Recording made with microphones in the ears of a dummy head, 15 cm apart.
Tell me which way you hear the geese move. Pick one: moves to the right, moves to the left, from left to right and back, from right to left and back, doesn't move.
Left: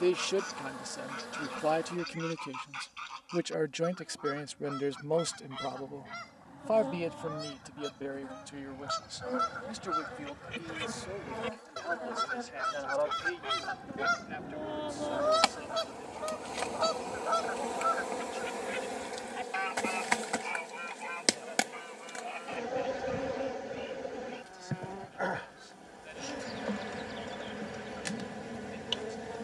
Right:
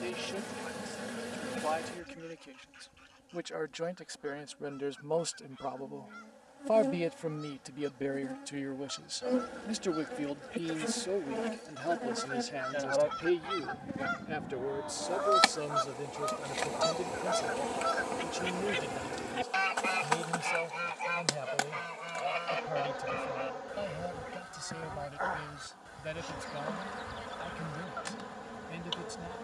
moves to the right.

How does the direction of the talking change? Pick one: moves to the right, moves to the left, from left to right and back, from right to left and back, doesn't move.
moves to the right.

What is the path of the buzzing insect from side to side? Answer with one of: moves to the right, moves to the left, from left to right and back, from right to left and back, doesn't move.
moves to the left.